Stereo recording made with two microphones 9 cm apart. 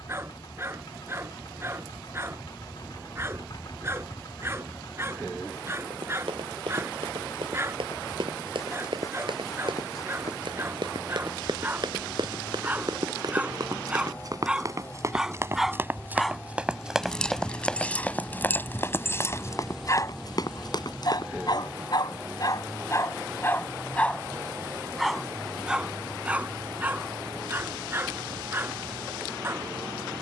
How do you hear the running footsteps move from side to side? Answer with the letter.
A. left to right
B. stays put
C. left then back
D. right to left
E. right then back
D.